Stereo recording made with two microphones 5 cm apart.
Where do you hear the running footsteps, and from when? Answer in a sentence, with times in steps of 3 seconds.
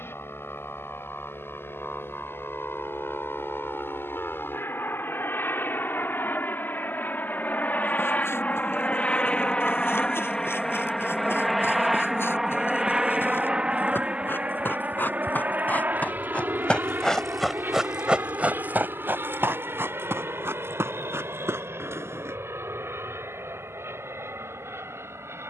You can hear the running footsteps not at all from 0 s, on the left from 6 s, on the right from 18 s and not at all from 24 s.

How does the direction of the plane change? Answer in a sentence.
You can hear the plane go from the left side to the right.